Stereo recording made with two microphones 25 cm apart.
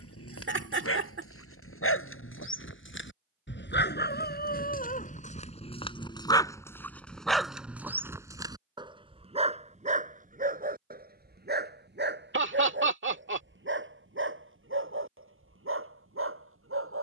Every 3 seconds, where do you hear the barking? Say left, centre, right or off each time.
left, left, centre, right, right, right.